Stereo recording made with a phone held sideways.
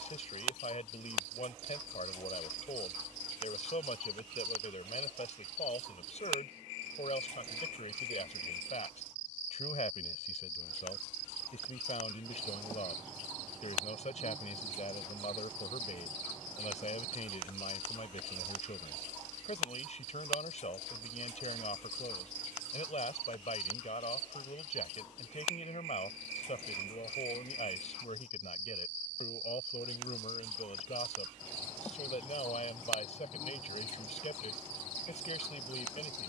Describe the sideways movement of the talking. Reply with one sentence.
You can hear the talking stay put.